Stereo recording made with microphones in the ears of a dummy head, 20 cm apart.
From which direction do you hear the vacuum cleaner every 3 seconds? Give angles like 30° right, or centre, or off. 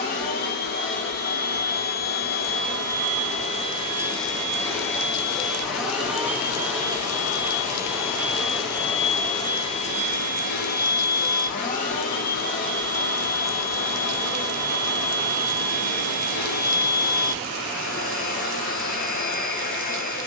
40° left, 10° left, 10° right, 30° left, 40° left, 40° left, 40° left.